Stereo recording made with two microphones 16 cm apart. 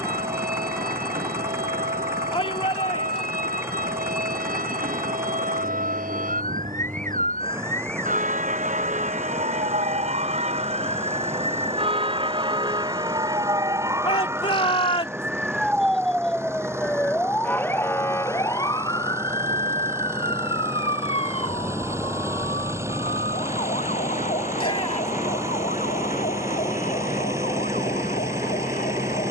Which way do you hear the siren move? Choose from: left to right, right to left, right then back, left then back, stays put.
right to left.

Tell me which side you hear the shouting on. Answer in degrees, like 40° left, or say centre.
30° left.